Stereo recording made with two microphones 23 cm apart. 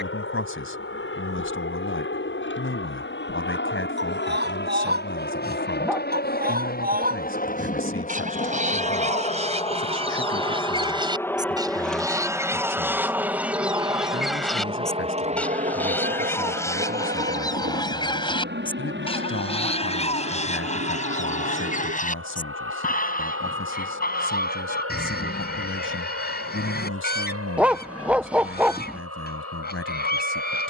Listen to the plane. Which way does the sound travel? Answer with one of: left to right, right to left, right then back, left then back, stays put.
left to right.